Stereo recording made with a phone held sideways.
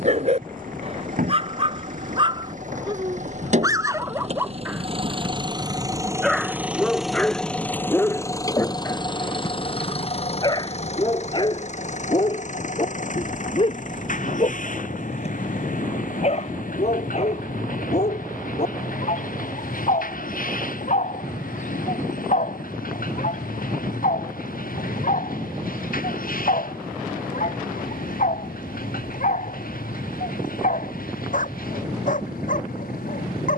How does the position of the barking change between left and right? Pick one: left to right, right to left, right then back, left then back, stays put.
right to left.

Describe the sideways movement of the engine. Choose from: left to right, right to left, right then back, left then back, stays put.
right to left.